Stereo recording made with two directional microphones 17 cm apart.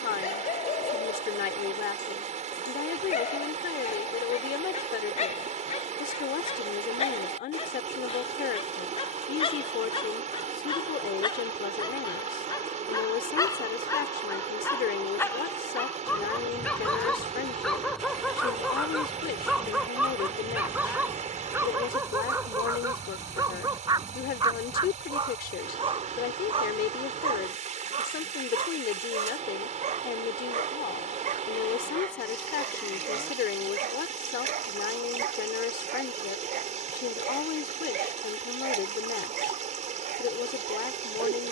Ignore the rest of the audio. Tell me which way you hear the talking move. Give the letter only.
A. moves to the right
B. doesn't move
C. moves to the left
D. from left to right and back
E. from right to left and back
B.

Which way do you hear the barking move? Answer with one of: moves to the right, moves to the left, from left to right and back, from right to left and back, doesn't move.
moves to the right.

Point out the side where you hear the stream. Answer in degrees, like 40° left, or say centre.
50° right.